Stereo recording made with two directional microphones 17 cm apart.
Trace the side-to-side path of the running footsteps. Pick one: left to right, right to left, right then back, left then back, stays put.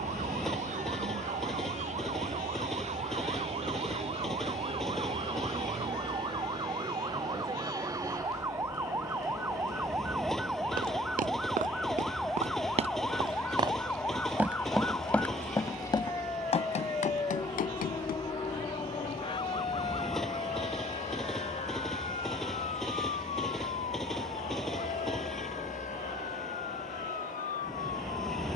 right to left.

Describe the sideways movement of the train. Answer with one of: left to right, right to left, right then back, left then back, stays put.
stays put.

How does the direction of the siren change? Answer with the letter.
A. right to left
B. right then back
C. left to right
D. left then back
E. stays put
A.